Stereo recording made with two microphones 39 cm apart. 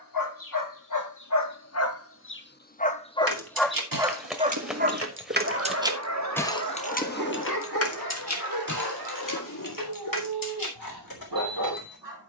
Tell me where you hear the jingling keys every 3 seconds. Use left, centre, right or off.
off, right, left, left.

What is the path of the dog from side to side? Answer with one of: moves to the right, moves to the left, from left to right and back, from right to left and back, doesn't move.
moves to the right.